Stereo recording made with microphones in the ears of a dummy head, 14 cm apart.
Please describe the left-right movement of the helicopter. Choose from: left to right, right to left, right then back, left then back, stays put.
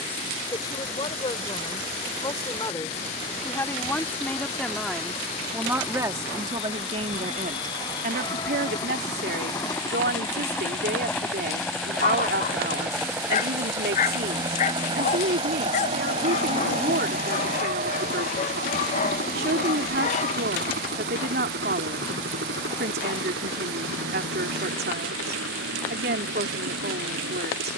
left to right.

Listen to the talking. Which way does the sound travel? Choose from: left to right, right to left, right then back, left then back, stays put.
left to right.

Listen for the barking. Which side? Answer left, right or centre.
left.